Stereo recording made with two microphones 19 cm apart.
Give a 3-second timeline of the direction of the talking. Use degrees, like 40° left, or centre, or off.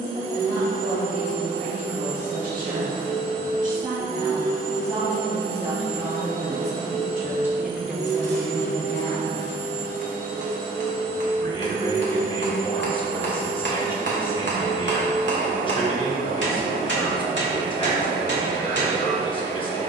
50° right, 40° right, 10° right, 20° left, 30° left, 30° left, 30° left.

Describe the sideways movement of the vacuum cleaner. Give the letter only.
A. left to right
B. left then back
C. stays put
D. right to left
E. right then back
C.